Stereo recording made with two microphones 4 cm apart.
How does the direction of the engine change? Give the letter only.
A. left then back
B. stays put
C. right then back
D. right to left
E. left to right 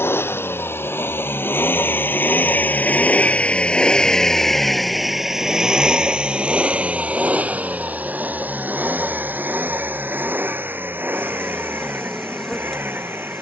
E.